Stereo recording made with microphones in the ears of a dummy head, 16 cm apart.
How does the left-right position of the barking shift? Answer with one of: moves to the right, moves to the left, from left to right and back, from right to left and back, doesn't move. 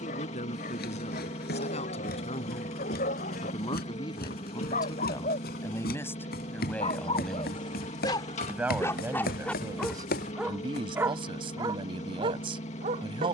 moves to the right.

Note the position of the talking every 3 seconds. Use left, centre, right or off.
left, left, centre, right, right.